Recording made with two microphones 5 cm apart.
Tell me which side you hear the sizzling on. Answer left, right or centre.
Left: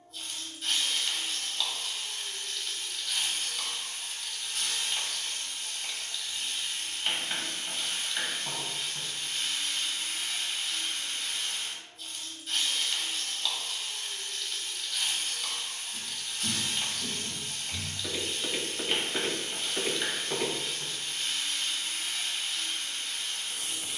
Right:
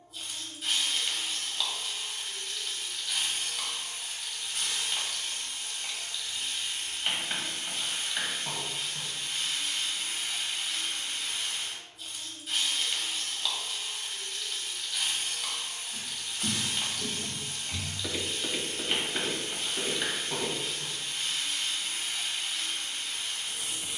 centre.